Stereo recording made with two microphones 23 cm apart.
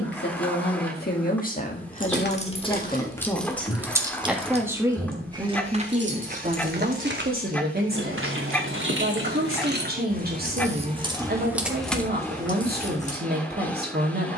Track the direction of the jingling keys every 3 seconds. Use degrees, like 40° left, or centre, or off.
30° left, 20° right, 60° right, 30° right, 20° left.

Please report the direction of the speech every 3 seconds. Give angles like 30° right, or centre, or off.
40° left, 10° right, 40° right, 40° right, 40° right.